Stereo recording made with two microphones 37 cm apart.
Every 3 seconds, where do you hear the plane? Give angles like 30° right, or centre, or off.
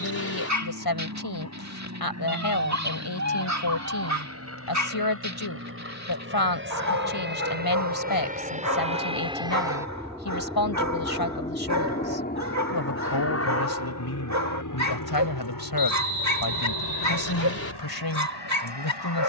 50° right, 40° right, 30° right, centre, 40° left, 60° left, 70° left.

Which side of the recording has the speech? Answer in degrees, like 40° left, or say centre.
70° left.